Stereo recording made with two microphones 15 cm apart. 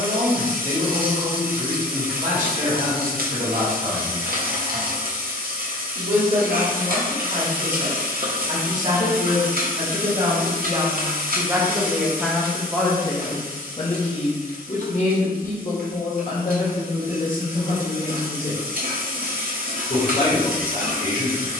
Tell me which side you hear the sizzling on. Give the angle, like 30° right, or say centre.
70° right.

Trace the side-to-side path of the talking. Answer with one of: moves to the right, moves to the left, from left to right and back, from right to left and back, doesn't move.
moves to the left.